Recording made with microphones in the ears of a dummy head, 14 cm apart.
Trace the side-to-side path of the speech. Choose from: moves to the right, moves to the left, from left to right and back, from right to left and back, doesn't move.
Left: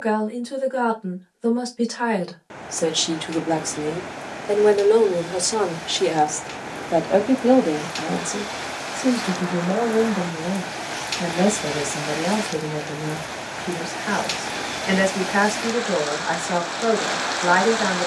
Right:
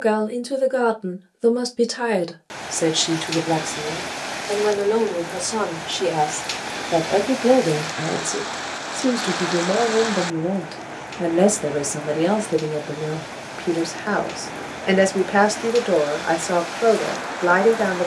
from right to left and back.